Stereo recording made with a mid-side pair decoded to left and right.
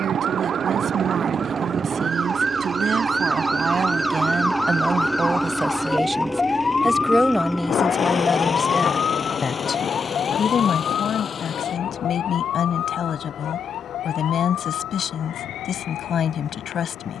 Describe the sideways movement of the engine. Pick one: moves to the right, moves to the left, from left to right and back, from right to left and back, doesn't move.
moves to the left.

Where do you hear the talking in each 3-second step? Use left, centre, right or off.
right, right, centre, left, left, left.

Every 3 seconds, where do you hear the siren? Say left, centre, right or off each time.
right, centre, left, left, left, left.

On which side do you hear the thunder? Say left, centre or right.
left.